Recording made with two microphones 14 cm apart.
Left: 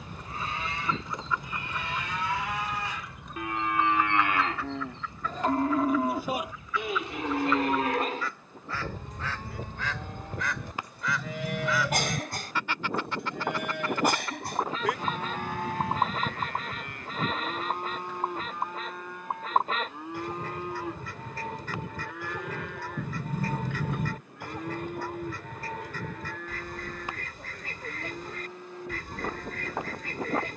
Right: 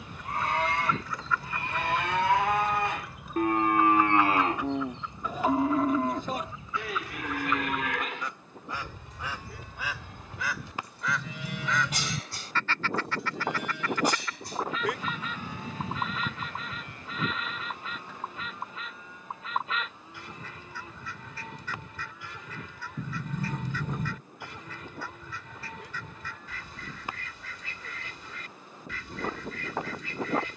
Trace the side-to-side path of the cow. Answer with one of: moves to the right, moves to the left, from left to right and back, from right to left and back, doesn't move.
moves to the left.